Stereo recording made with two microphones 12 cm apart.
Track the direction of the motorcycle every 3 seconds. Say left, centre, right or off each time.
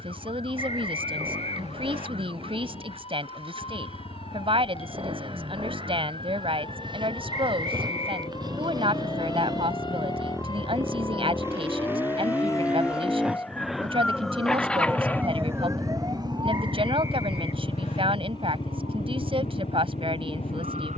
right, right, right, right, centre, left, left.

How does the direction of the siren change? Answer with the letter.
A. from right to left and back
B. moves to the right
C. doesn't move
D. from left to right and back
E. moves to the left
B.